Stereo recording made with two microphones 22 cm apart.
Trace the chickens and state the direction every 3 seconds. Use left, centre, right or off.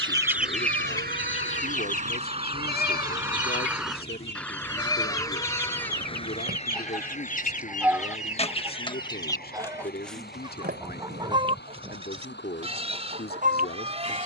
left, left, left, centre, right.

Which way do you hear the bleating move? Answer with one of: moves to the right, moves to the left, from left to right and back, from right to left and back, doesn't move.
moves to the right.